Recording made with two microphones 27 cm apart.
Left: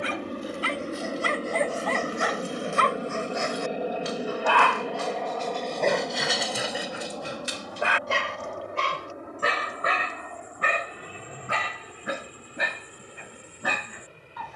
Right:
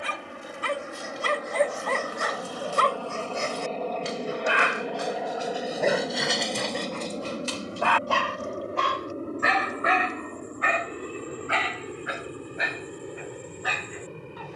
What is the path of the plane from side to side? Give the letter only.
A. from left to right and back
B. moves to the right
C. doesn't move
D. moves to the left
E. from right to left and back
B.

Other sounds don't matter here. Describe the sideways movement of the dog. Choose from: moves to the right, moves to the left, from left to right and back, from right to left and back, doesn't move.
moves to the left.